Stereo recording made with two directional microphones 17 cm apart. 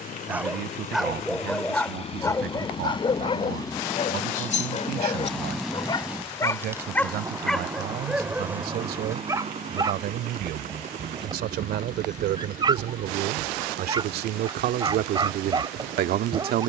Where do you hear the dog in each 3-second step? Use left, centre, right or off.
centre, left, centre, right, right, right.